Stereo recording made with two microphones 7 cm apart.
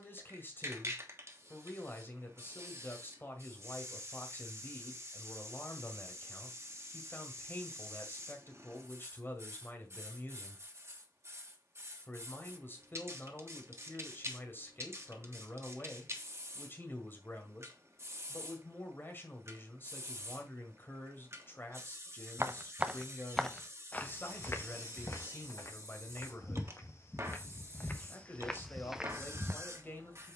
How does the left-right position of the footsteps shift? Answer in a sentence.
You can hear the footsteps move from right to left and back again.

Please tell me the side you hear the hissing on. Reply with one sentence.
In this clip you hear the hissing on the right.